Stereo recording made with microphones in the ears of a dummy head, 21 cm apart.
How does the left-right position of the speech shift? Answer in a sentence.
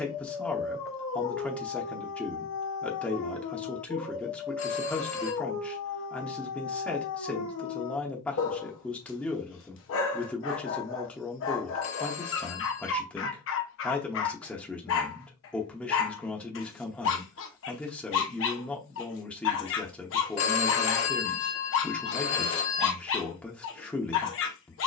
You can hear the speech stay in one place.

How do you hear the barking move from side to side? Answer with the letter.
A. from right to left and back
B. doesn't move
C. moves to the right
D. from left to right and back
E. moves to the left
B.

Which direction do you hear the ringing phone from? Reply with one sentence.
In this clip you hear the ringing phone on the left.